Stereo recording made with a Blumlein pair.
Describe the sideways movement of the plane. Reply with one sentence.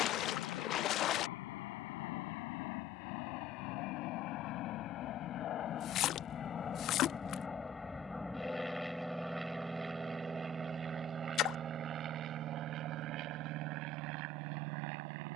You can hear the plane go from the left side to the right.